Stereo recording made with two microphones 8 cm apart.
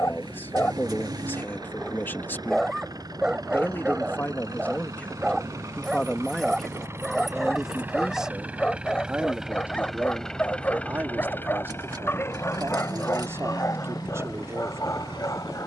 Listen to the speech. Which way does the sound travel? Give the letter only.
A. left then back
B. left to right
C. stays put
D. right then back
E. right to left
B.